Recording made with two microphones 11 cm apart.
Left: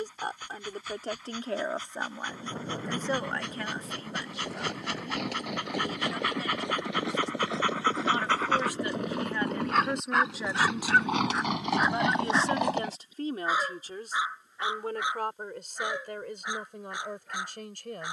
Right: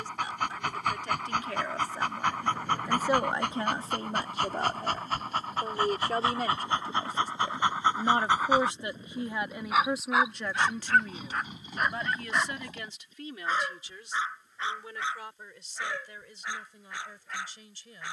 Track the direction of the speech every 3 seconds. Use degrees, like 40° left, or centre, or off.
30° left, 40° right, 40° right, centre, 40° left, 60° left.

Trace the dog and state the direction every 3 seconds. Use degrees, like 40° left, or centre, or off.
70° right, 50° right, 20° right, centre, 10° left, 20° left.